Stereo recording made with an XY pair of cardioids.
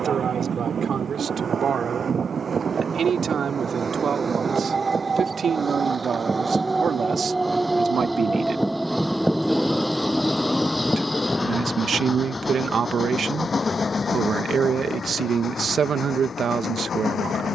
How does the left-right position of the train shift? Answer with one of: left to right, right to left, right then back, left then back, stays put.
right to left.